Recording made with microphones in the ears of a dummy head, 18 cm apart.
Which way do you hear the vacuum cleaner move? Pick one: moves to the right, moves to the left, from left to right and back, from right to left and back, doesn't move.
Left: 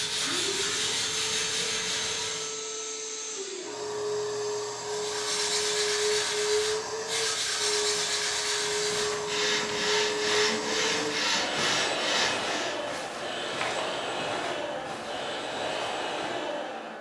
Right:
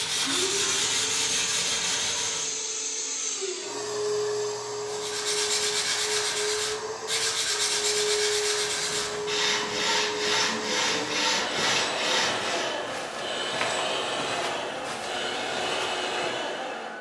from right to left and back.